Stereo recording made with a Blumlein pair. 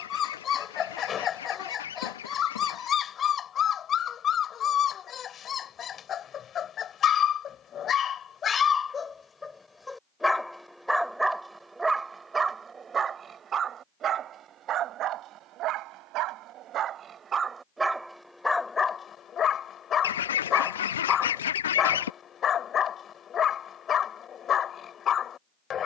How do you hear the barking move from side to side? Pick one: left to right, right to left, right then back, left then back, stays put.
right then back.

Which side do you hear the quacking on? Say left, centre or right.
left.